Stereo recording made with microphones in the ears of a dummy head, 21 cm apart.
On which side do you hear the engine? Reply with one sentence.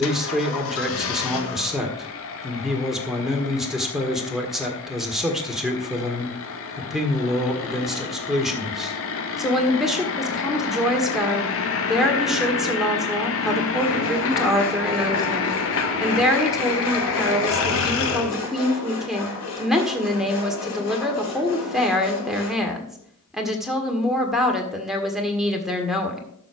In this clip you hear the engine on the left.